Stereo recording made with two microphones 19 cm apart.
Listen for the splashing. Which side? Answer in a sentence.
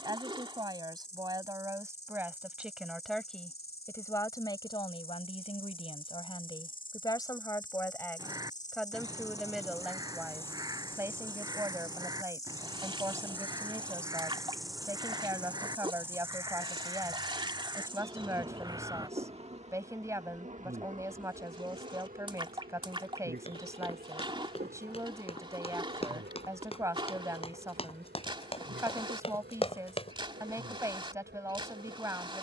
In this clip you hear the splashing on the right.